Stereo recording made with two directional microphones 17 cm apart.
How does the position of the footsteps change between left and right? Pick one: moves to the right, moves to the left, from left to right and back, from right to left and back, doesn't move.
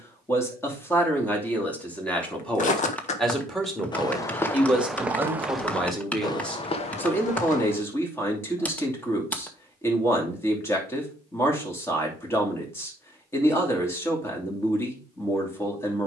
from left to right and back.